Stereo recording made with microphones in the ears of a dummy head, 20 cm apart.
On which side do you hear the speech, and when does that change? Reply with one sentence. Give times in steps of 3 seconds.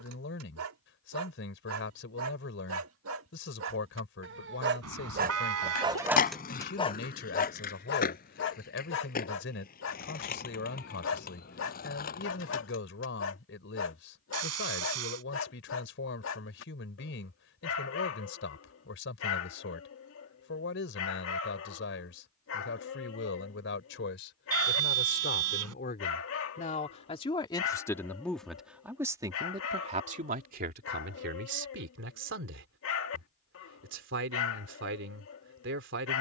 In this clip you hear the speech on the left from 0 s, in the centre from 27 s and on the right from 30 s.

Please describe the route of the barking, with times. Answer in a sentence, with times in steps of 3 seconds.
You can hear the barking on the right from 0 s and on the left from 6 s.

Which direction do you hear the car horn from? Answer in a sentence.
You can hear the car horn on the right.